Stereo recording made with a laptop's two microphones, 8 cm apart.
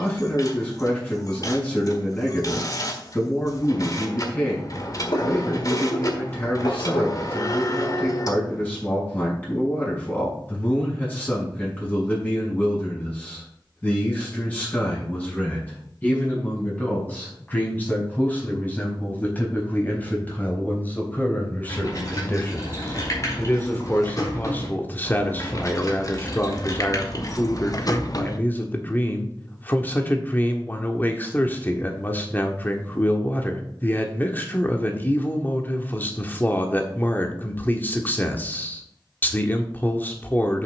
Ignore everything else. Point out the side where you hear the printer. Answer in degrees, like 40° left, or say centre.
50° left.